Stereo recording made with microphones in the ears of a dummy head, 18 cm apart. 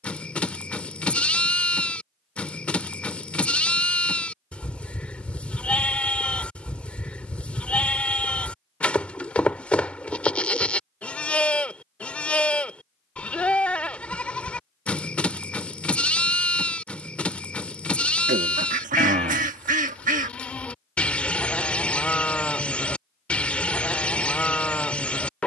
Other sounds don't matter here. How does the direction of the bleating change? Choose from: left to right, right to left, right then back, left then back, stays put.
stays put.